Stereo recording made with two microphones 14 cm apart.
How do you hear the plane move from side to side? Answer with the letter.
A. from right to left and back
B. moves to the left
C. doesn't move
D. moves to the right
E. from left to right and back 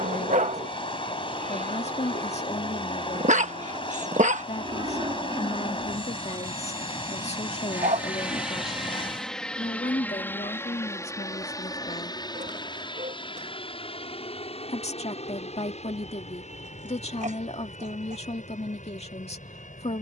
B.